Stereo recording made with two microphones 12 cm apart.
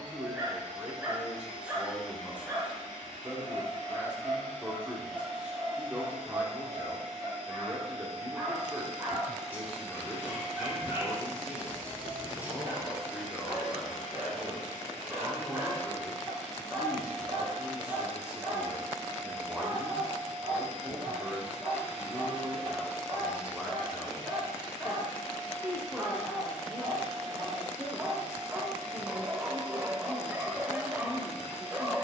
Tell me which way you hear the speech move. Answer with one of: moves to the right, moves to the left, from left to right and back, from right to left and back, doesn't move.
doesn't move.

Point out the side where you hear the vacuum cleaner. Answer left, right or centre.
right.